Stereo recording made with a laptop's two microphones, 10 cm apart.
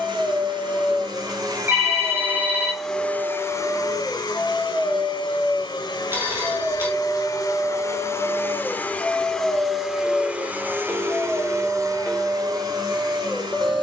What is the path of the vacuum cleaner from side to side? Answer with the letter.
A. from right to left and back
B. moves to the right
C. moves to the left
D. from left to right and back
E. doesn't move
A.